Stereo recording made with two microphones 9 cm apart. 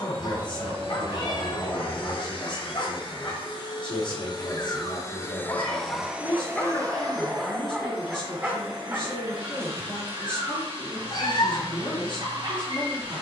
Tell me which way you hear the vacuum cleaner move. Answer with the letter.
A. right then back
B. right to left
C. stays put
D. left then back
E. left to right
E.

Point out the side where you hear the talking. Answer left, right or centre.
left.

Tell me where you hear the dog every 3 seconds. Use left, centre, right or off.
left, left, centre, right, right.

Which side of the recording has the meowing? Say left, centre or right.
left.